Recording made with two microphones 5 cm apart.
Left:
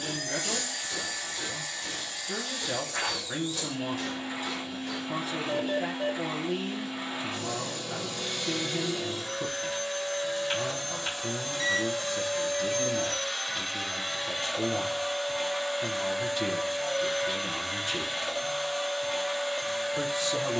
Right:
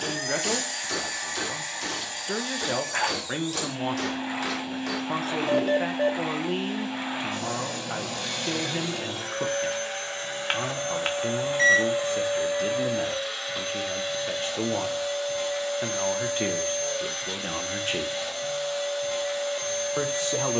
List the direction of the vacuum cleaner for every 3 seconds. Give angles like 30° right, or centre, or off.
60° right, 60° right, 60° right, 40° right, centre, 10° left, 10° left.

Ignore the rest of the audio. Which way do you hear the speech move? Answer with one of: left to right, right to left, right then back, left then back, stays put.
stays put.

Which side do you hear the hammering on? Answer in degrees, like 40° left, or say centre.
80° right.